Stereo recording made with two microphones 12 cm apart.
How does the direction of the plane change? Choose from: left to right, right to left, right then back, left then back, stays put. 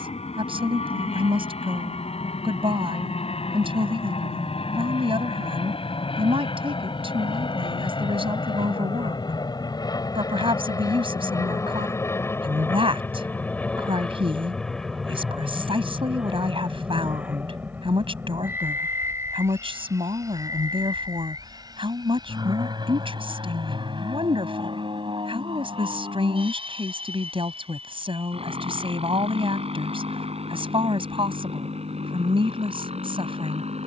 left to right.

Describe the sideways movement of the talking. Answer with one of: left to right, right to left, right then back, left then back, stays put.
stays put.